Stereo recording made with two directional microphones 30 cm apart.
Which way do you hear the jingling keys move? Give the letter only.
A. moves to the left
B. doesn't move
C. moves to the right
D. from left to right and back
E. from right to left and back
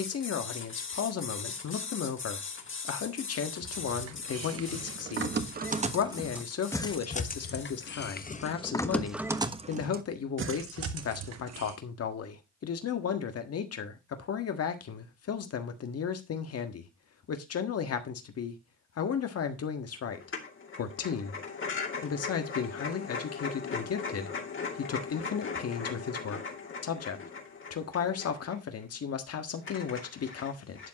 E.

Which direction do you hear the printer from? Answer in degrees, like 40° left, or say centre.
40° left.